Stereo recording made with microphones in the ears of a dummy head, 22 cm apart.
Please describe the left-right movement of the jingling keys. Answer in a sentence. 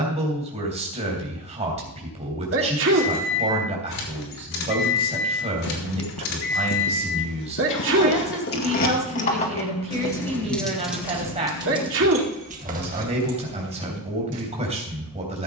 You can hear the jingling keys move to the right.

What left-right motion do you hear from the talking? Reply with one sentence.
You can hear the talking stay in one place.